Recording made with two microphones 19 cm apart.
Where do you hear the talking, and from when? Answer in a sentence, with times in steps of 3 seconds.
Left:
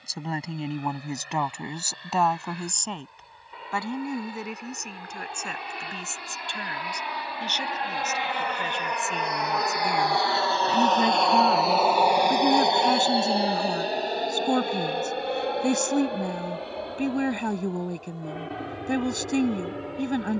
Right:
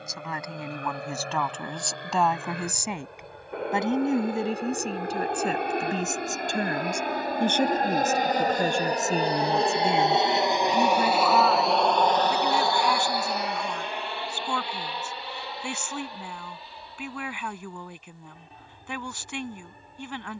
In this clip you hear the talking in the centre from 0 s, on the right from 3 s, in the centre from 9 s and on the left from 12 s.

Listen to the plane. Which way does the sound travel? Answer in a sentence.
In this clip you hear the plane travel towards the left.